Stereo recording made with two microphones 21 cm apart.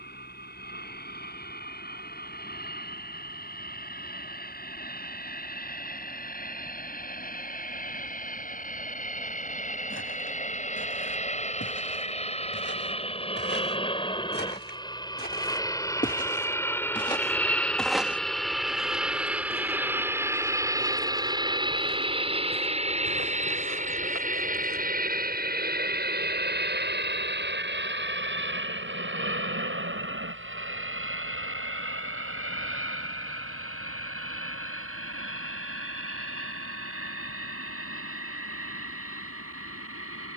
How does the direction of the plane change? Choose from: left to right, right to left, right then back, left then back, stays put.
left to right.